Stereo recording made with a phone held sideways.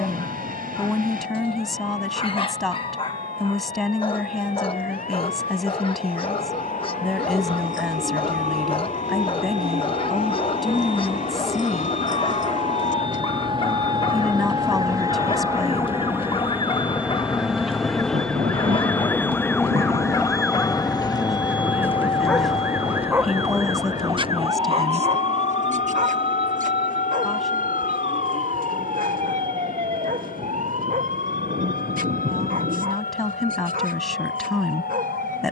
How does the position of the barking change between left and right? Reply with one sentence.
In this clip you hear the barking move to the right.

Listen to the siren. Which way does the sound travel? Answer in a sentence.
In this clip you hear the siren move to the right.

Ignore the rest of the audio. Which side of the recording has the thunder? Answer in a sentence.
You can hear the thunder on the right.